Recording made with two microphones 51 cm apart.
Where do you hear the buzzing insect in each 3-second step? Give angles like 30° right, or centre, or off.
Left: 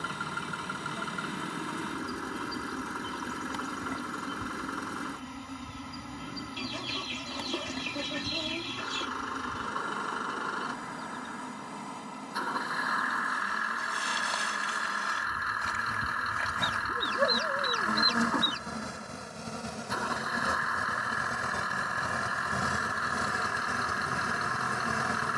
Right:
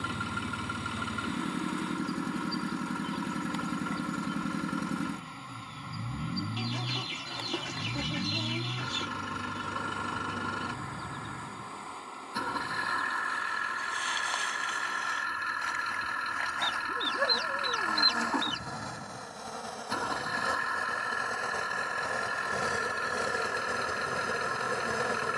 60° left, 60° left, 60° left, 60° left, 60° left, 60° left, 50° left, 30° left, 20° left.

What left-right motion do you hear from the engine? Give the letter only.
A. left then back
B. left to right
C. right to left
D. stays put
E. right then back
D.